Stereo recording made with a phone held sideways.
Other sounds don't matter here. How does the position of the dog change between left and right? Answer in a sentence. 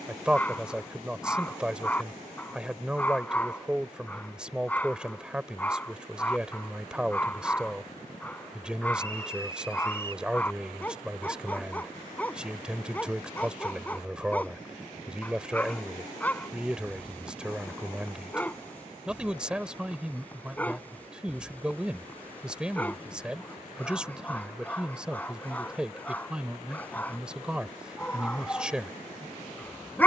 In this clip you hear the dog stay in one place.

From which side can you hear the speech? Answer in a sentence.
In this clip you hear the speech in the centre.